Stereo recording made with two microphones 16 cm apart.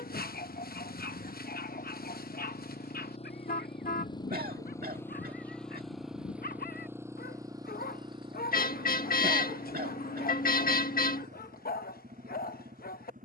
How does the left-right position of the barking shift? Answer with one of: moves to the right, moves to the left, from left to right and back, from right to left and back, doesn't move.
doesn't move.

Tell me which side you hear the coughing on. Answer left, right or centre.
right.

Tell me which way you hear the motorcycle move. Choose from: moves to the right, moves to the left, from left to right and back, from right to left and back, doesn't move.
moves to the right.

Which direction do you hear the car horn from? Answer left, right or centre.
left.